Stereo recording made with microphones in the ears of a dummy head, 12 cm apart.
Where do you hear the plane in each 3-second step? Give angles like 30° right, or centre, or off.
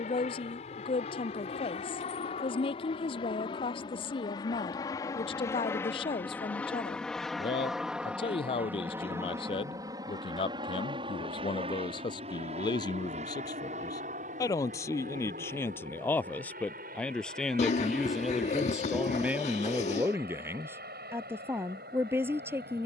50° left, 30° left, centre, 30° right, 50° right, 60° right, 70° right, 70° right.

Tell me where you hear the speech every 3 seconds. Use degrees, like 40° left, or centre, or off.
40° left, 40° left, 40° left, 40° left, 30° left, 10° left, 10° right, 20° right.